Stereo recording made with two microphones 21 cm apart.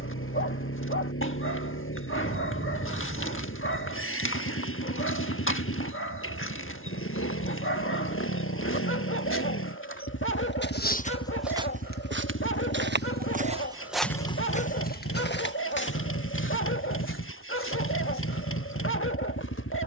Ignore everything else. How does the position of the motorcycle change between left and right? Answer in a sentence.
You can hear the motorcycle stay in one place.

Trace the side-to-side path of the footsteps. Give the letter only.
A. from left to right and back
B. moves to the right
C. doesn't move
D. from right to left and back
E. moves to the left
A.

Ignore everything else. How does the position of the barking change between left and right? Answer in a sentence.
You can hear the barking stay put.